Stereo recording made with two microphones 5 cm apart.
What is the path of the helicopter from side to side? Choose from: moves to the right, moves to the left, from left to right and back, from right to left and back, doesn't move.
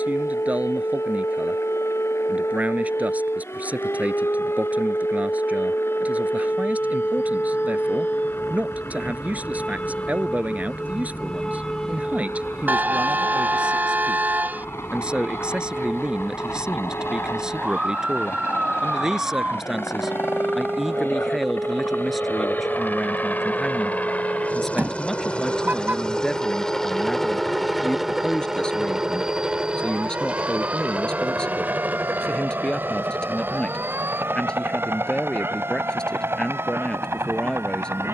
moves to the right.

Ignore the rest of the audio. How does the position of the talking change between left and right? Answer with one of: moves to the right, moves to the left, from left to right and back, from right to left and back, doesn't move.
moves to the left.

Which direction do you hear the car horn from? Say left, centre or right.
right.